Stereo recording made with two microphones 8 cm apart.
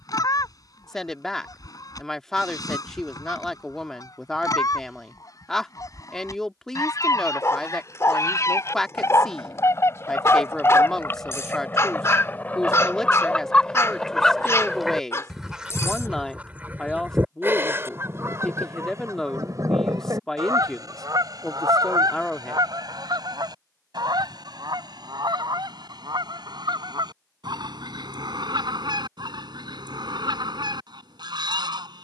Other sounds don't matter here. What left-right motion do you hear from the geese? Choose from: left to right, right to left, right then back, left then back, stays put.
left to right.